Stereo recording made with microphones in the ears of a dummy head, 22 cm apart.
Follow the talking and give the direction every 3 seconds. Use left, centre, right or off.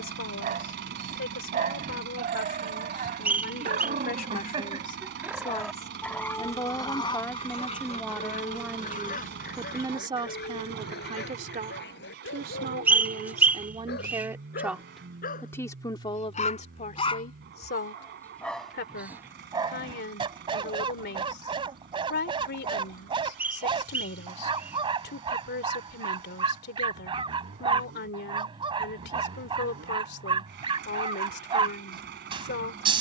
left, left, centre, right, right, left, left, left, left, left, left.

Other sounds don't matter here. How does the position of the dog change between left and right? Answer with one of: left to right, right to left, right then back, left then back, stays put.
left then back.